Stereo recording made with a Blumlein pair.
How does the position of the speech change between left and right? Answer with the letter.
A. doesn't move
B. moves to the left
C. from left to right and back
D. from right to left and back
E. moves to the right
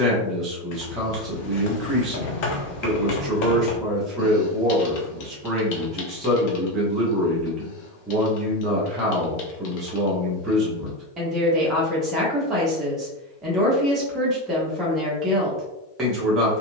A.